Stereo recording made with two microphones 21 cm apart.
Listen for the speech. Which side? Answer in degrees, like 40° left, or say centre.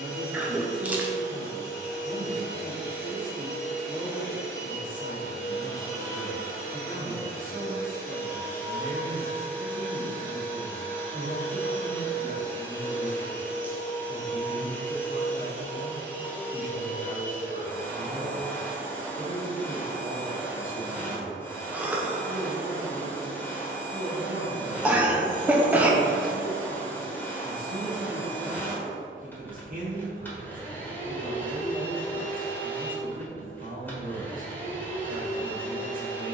40° right.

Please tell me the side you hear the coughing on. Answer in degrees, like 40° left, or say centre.
10° right.